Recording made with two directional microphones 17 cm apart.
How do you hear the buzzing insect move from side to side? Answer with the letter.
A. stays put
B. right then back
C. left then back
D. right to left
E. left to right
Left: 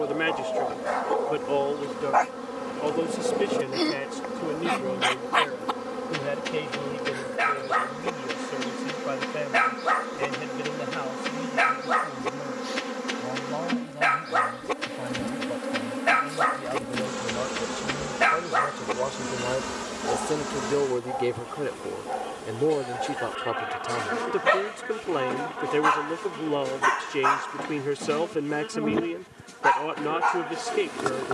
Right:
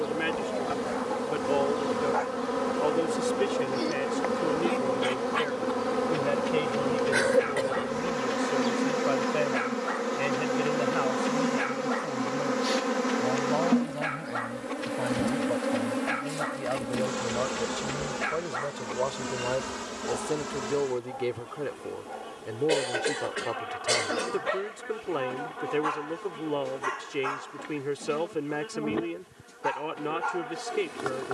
D.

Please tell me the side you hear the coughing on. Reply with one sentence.
In this clip you hear the coughing on the right.